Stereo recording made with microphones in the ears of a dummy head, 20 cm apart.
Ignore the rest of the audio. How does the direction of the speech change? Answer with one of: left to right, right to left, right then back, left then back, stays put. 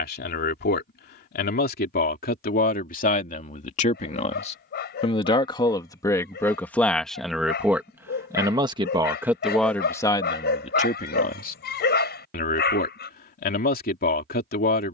right then back.